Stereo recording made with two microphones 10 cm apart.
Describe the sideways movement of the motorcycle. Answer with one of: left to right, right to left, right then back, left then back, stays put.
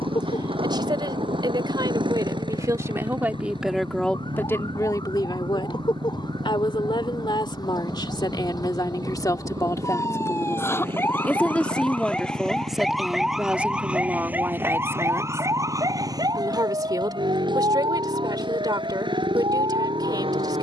stays put.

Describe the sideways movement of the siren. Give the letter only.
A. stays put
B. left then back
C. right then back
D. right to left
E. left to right
E.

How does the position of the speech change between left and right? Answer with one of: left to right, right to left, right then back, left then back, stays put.
left then back.